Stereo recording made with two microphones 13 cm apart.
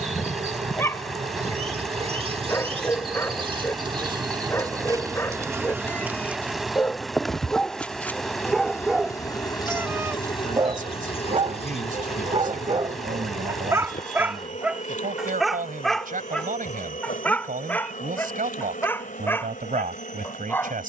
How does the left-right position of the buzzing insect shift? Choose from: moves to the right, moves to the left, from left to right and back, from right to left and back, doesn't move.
moves to the left.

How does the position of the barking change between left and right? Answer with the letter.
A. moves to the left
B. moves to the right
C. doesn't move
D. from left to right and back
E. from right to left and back
D.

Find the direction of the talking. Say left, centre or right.
right.